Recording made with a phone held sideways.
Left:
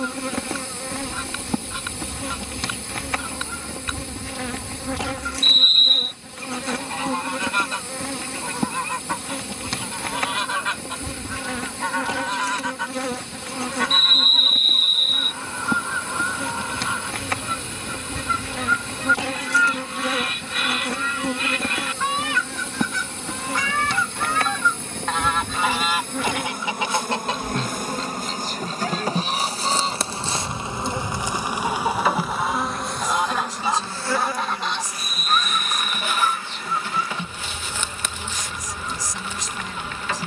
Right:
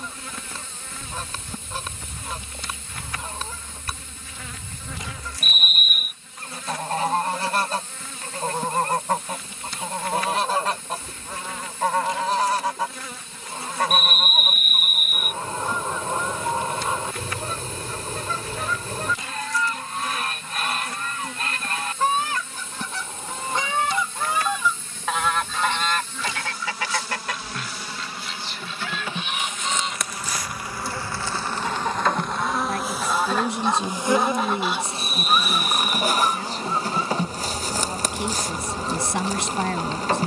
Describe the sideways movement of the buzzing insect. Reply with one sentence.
In this clip you hear the buzzing insect travel towards the right.